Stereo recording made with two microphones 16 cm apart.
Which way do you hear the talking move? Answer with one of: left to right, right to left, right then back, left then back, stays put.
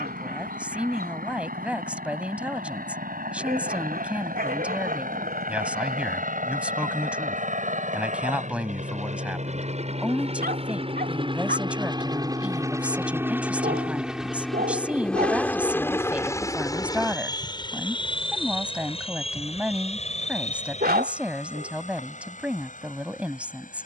stays put.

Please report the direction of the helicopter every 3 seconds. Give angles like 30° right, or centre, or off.
80° right, 70° right, 60° right, 40° right, 10° right, 20° left, 40° left, 50° left.